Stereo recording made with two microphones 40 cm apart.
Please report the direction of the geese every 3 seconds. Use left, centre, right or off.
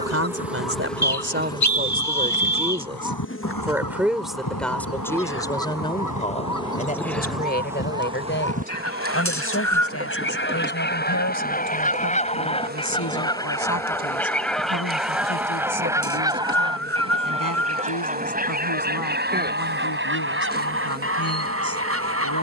left, left, left, left, centre, centre, right, right.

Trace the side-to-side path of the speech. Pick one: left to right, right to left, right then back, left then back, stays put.
right to left.